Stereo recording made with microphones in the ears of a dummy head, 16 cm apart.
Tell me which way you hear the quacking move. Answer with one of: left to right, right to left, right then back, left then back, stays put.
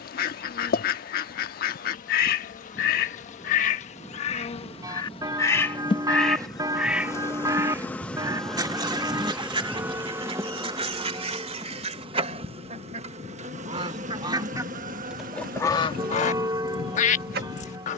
right then back.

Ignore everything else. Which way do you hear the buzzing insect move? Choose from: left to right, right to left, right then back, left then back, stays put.
left to right.